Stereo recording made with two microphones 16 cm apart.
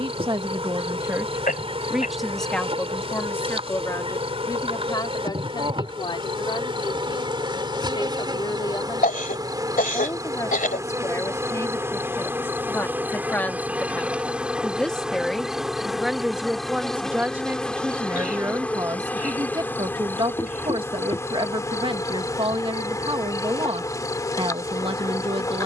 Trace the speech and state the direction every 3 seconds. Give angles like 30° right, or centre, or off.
10° right, 20° left, 30° left, 20° left, 10° left, 10° right, 20° right, 30° right, 30° right.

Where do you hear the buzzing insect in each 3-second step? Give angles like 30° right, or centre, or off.
40° right, 40° right, 30° right, 20° right, 10° right, centre, 10° left, 20° left, 20° left.